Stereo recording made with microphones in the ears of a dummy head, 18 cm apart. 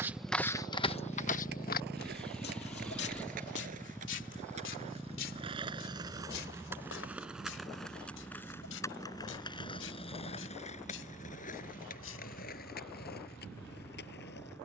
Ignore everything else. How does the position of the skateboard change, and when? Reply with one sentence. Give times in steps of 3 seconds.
You can hear the skateboard on the right from 0 s, in the centre from 6 s and on the left from 9 s.